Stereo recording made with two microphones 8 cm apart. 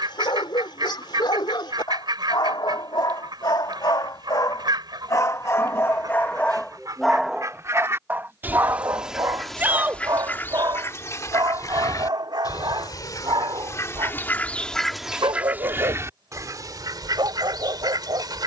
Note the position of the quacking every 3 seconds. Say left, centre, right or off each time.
right, right, right, left, left, right.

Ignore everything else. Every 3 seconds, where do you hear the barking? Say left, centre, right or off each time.
left, left, centre, right, right, right.